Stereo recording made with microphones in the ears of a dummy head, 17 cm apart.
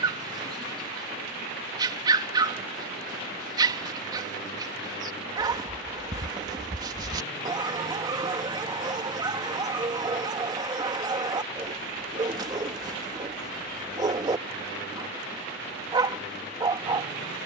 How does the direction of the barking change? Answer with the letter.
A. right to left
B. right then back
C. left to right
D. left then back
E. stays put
E.